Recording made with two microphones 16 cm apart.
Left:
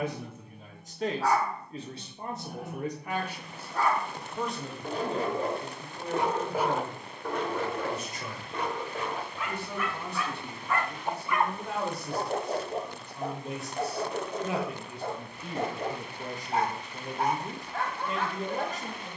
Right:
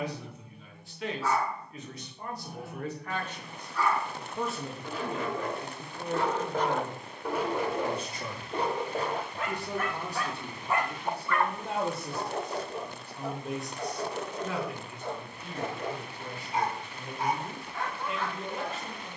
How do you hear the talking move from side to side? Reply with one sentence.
You can hear the talking move from left to right and back again.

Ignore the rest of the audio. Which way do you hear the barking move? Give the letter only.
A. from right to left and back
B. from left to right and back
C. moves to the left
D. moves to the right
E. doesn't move
B.